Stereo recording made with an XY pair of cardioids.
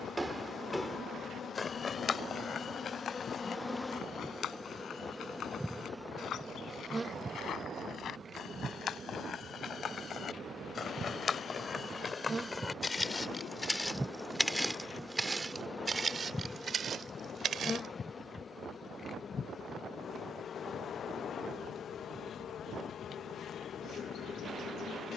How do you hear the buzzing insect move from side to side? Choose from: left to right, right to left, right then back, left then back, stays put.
right then back.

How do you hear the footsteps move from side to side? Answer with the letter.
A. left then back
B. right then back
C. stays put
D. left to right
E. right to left
A.